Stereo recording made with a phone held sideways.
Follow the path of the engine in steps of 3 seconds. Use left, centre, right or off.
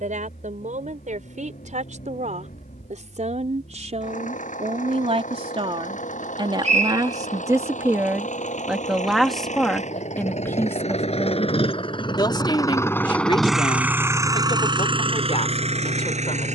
left, left, left, left, centre, right.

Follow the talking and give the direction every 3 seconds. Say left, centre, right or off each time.
right, right, right, centre, left, left.